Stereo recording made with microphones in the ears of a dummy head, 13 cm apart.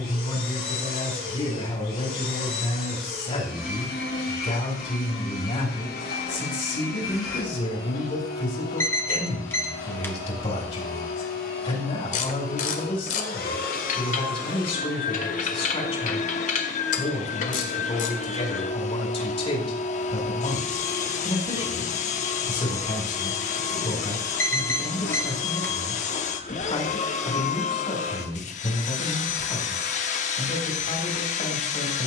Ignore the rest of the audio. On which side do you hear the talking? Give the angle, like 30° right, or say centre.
40° left.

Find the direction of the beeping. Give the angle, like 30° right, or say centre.
20° left.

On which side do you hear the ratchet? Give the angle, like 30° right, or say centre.
50° left.